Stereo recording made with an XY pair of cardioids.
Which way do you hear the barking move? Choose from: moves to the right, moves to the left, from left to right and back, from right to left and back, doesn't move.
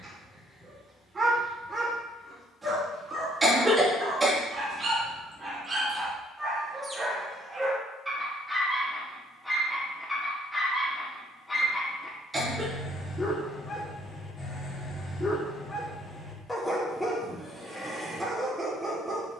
from right to left and back.